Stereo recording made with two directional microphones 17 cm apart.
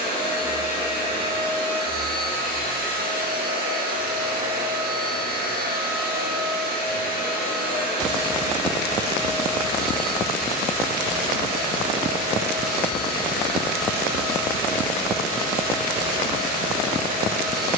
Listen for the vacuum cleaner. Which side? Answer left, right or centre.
right.